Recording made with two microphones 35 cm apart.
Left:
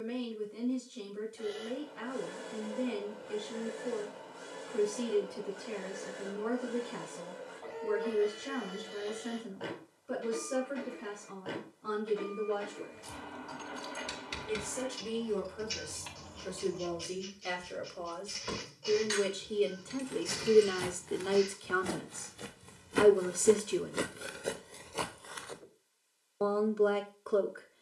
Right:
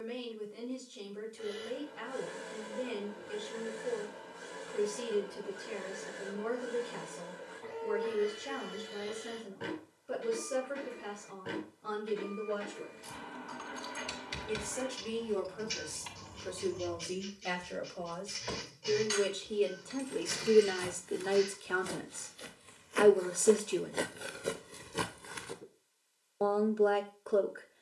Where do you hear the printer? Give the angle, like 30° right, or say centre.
30° right.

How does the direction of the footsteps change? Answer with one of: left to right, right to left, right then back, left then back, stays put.
left to right.